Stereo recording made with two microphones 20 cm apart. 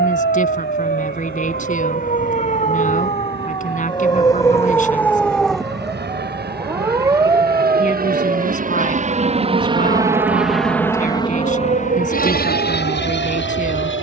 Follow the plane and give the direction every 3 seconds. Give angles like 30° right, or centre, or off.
80° right, 70° right, 60° right, centre, 50° left.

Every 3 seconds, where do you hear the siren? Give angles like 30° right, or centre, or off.
50° left, 10° left, 20° right, 40° right, 50° right.